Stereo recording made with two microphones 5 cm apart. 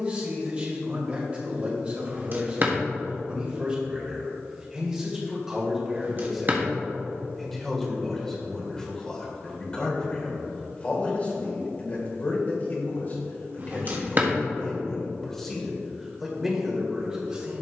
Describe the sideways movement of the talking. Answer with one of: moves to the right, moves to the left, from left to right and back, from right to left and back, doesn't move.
from right to left and back.